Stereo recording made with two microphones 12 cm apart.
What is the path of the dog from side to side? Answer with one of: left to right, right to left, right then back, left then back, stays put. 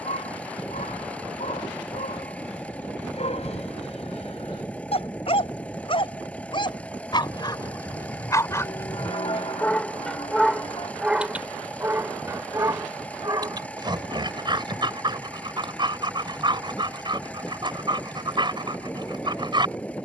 left to right.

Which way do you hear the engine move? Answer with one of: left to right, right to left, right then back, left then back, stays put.
stays put.